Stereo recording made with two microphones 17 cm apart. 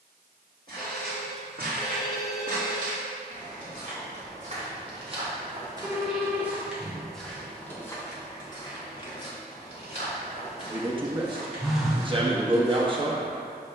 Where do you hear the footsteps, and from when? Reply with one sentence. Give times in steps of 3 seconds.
In this clip you hear the footsteps on the right from 0 s, in the centre from 6 s and on the left from 9 s.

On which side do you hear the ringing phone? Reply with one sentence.
In this clip you hear the ringing phone in the centre.